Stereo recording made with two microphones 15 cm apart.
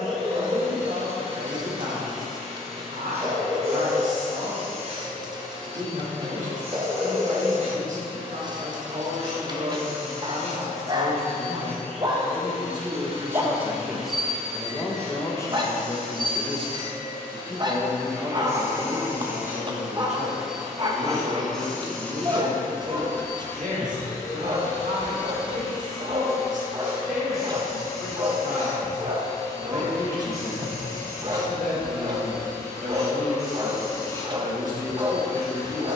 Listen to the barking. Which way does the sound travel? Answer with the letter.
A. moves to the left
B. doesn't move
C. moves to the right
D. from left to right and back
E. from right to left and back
B.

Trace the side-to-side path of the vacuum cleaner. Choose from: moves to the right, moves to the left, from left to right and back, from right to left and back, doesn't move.
moves to the left.